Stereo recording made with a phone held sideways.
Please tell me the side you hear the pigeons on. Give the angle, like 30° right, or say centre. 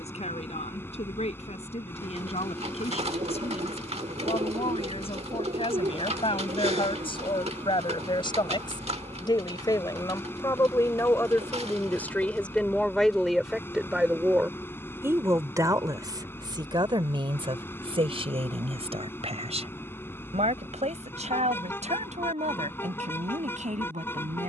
60° right.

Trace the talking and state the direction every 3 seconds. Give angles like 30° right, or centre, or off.
60° left, 50° left, 40° left, 30° left, centre, 30° right, 60° right, 70° right.